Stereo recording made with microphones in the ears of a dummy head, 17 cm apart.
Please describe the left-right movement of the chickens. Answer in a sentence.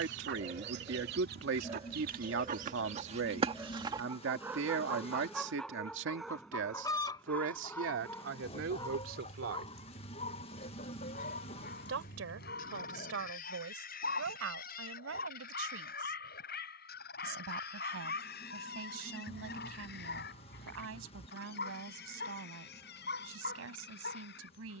In this clip you hear the chickens move to the left.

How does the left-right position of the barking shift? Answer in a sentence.
You can hear the barking travel towards the left.